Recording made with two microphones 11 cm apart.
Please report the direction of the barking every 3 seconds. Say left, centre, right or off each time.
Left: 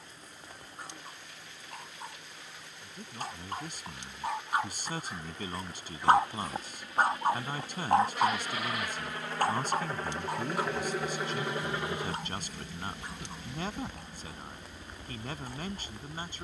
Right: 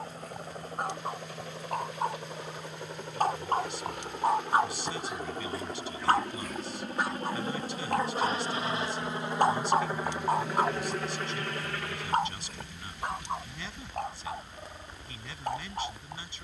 right, right, left, right, right, right.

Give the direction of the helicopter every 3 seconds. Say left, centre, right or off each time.
right, right, right, centre, left, left.